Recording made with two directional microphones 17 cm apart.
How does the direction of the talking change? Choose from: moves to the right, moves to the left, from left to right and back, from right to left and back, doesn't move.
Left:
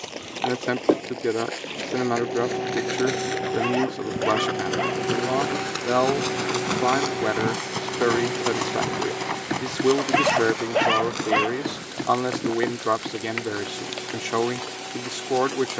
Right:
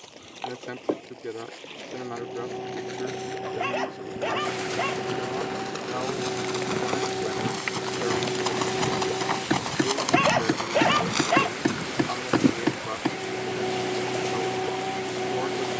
doesn't move.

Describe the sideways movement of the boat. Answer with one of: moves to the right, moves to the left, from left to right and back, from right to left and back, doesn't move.
moves to the right.